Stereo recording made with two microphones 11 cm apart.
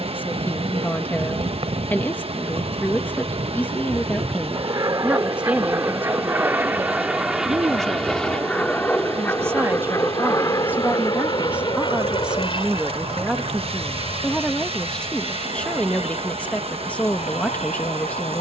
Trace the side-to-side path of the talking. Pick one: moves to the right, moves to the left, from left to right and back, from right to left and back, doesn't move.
from left to right and back.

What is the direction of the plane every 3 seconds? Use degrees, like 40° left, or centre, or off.
60° right, 40° right, centre, 30° left, 50° left, 60° left.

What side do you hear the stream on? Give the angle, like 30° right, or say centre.
60° right.